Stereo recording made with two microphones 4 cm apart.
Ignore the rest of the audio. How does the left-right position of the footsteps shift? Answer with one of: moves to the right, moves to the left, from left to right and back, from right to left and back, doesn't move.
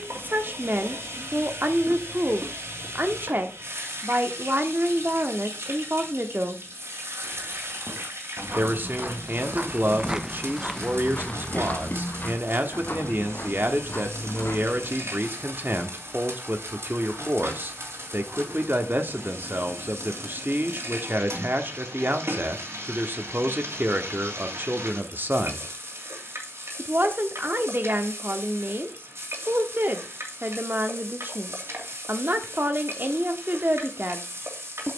moves to the left.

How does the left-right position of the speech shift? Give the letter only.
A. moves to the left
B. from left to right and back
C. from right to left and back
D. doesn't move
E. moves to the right
D.